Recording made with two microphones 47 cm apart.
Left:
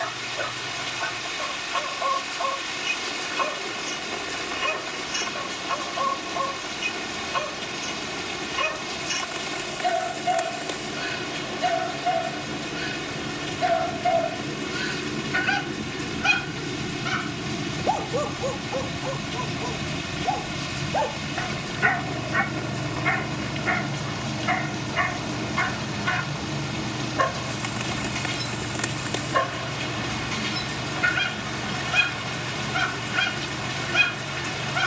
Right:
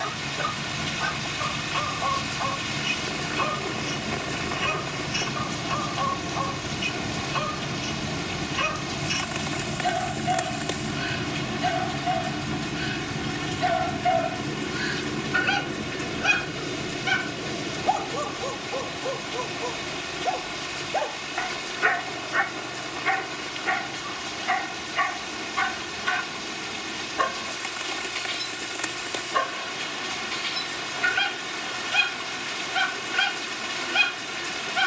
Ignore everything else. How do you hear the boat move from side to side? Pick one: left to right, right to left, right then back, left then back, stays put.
right to left.